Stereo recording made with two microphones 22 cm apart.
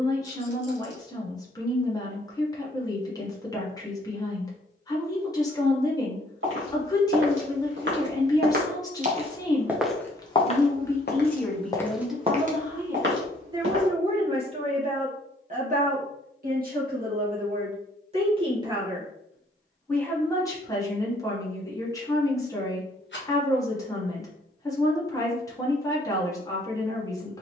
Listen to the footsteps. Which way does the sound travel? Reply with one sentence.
In this clip you hear the footsteps move from right to left and back again.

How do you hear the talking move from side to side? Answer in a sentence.
You can hear the talking move from left to right and back again.